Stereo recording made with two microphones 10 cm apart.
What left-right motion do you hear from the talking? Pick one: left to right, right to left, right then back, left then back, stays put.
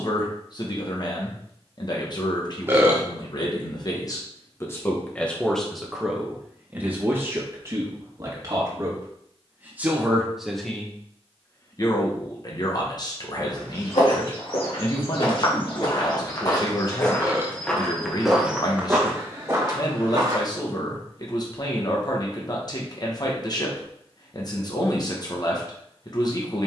right then back.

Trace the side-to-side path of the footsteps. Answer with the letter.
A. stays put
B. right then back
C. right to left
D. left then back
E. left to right
E.